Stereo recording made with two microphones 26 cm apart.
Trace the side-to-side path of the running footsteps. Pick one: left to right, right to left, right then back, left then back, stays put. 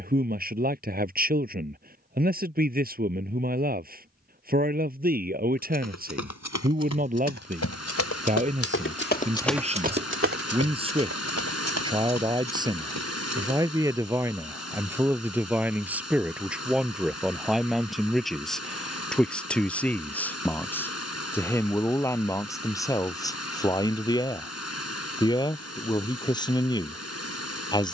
left to right.